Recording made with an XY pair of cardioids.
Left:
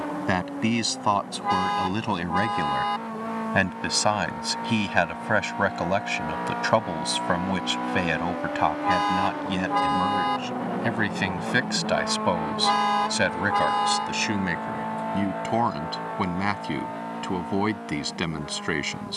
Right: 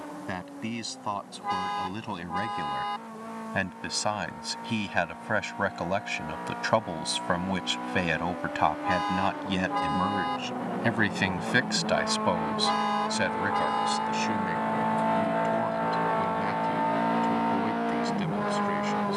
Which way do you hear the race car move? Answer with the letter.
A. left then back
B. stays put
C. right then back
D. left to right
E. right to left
D.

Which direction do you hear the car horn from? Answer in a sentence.
In this clip you hear the car horn on the left.